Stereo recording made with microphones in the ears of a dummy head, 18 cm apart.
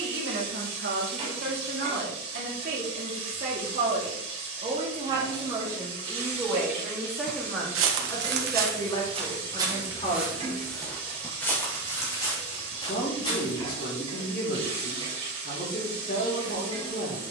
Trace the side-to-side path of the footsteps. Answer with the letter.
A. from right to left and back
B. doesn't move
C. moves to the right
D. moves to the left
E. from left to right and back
D.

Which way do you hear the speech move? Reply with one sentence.
In this clip you hear the speech travel towards the left.